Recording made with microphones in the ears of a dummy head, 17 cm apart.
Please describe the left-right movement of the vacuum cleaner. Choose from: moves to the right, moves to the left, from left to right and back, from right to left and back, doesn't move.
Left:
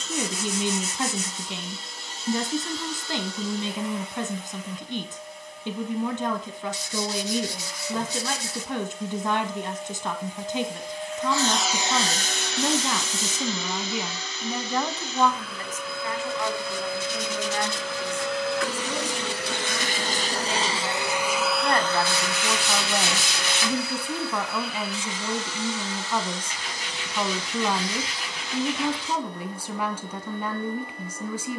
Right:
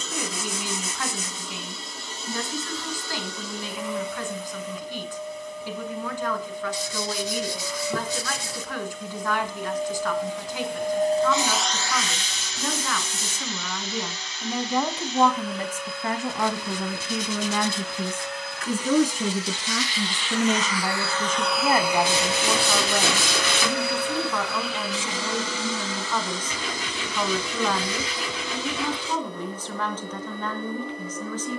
from right to left and back.